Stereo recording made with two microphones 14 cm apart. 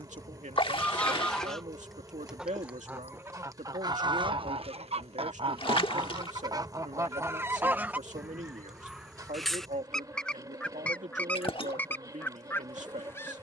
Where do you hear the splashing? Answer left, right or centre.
left.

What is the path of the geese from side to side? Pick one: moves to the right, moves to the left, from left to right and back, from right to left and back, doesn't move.
from left to right and back.